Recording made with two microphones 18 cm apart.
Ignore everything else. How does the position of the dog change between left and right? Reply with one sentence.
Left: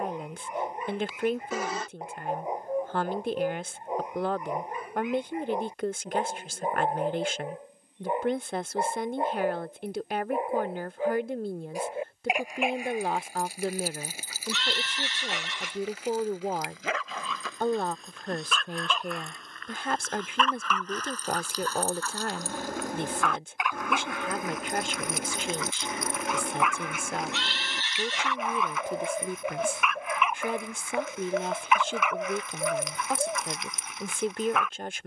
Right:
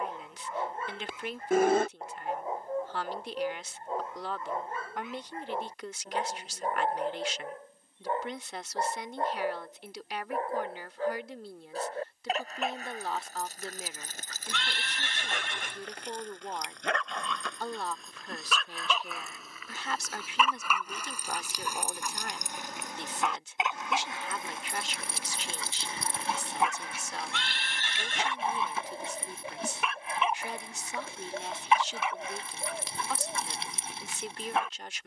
In this clip you hear the dog move to the right.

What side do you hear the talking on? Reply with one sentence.
You can hear the talking on the left.